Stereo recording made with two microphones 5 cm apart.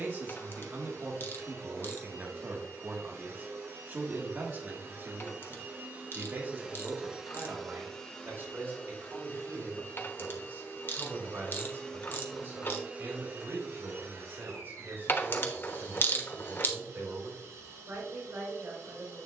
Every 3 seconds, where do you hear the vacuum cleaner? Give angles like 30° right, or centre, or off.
70° right, 50° right, centre, 40° left, 40° right, 70° right, 70° right.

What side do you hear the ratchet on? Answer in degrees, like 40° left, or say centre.
40° left.